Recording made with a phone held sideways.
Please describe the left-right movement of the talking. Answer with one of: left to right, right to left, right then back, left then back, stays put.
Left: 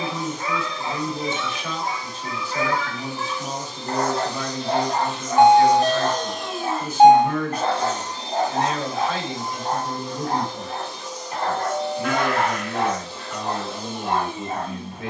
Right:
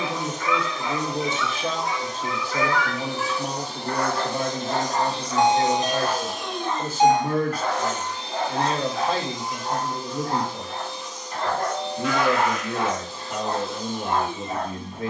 stays put.